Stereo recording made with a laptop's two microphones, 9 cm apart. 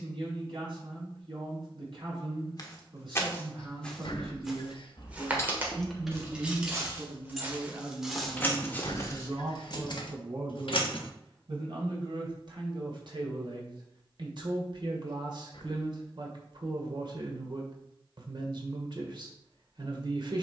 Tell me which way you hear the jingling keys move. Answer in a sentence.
You can hear the jingling keys move from left to right and back again.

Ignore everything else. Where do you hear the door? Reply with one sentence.
You can hear the door on the left.